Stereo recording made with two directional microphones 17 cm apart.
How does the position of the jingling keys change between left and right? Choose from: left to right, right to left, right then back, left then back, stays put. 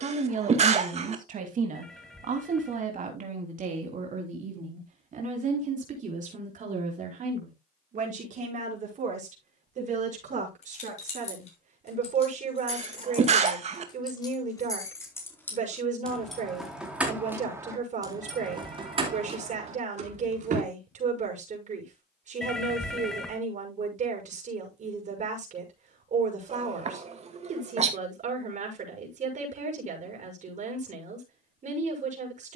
left to right.